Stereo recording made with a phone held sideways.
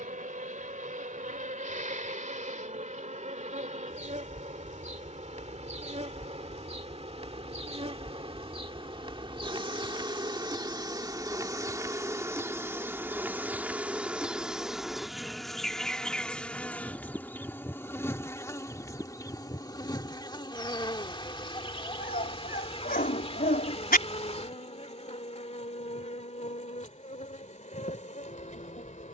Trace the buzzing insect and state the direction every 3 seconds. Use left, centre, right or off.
right, right, right, right, centre, centre, left, left, left, left.